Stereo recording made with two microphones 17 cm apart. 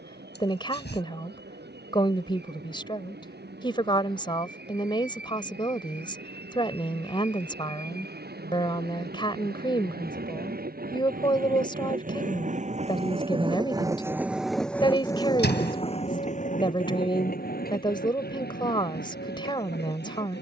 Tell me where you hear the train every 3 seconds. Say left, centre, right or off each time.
right, right, right, right, right, left, left.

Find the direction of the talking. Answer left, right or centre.
left.